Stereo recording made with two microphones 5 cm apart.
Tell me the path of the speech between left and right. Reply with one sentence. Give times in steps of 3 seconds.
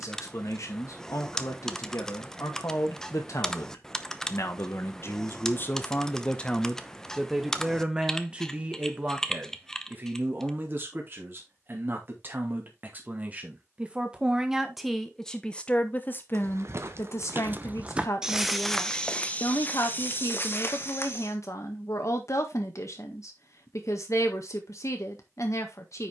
In this clip you hear the speech on the left from 0 s, in the centre from 6 s, on the right from 9 s and on the left from 15 s.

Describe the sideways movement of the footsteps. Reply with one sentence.
You can hear the footsteps move from right to left.